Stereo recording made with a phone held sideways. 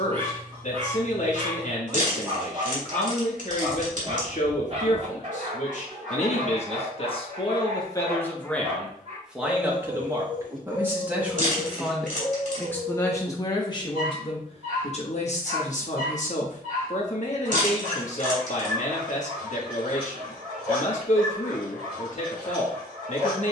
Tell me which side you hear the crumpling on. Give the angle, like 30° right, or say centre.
60° right.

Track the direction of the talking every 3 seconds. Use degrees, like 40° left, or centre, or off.
60° left, 60° left, 30° left, 10° right, 30° left, 50° left, 50° left, 50° left.